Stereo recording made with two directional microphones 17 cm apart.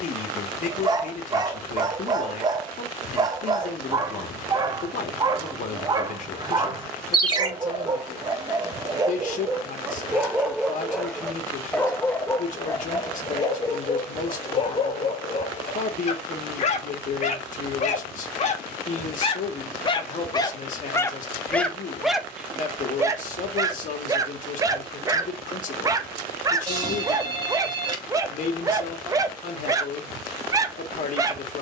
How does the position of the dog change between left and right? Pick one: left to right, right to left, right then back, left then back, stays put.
left then back.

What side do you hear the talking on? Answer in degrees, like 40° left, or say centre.
50° left.